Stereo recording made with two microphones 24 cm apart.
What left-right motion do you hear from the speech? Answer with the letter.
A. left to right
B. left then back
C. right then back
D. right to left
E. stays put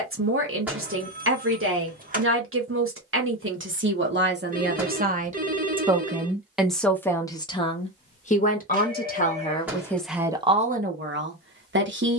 B.